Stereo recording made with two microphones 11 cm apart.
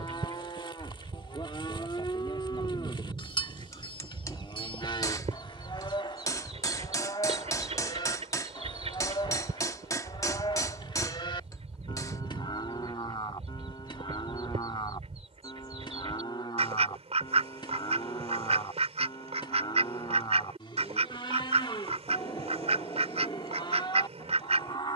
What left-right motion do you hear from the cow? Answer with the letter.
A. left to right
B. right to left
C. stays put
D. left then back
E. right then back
C.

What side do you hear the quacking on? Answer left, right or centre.
right.